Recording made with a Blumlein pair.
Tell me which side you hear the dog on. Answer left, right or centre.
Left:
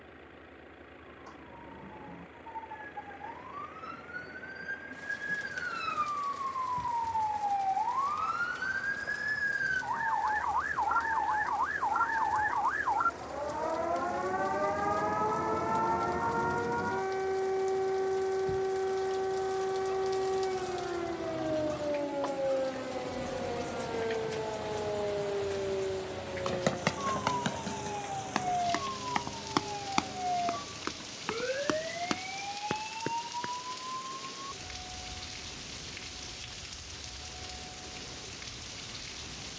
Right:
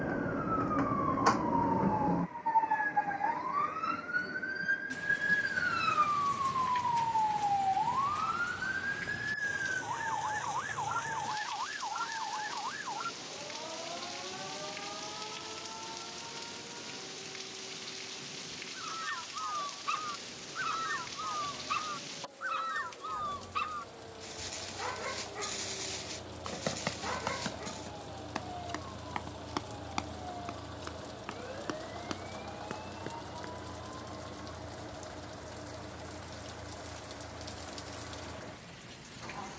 right.